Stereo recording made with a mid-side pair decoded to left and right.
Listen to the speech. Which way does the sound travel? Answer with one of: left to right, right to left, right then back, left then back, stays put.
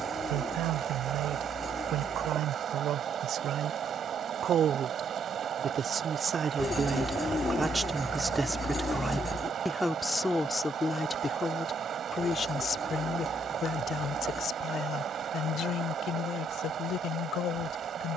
right to left.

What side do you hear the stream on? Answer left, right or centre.
right.